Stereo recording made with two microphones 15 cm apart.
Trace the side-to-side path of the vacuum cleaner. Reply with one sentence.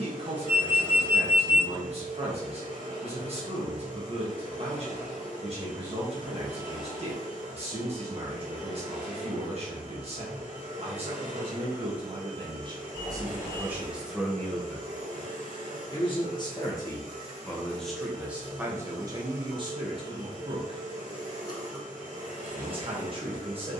You can hear the vacuum cleaner stay in one place.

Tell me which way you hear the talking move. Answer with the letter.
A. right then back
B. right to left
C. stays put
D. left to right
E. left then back
E.